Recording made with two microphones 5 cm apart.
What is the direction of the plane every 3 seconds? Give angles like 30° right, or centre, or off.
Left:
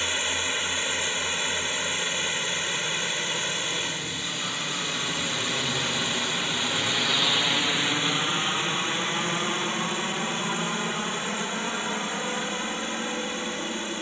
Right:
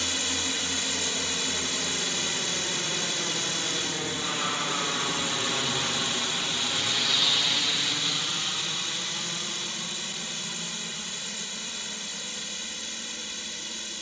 50° right, 20° right, 20° left, 50° left, 60° left.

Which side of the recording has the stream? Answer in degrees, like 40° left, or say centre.
30° left.